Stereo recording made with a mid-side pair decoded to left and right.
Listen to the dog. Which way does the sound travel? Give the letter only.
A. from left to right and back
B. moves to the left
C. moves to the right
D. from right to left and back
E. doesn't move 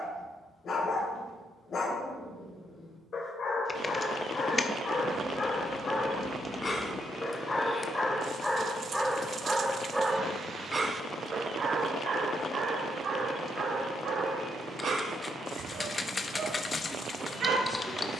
C.